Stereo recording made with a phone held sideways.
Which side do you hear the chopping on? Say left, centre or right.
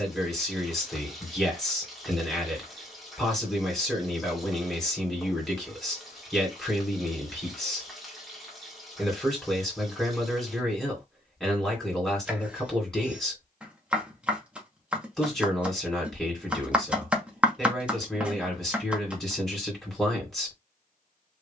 centre.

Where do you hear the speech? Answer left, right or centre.
centre.